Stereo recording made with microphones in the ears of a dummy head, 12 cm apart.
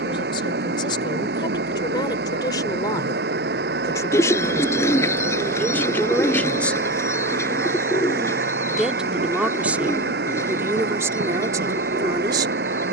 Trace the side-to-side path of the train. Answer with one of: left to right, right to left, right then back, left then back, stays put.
stays put.